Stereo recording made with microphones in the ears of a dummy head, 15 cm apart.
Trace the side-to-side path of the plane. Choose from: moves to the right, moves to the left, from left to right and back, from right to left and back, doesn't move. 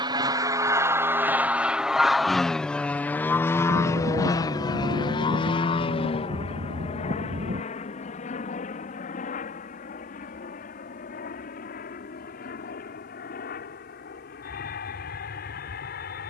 moves to the left.